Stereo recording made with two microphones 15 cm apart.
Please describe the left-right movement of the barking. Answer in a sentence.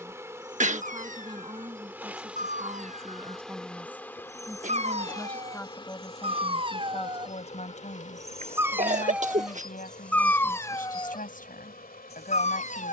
In this clip you hear the barking move from right to left.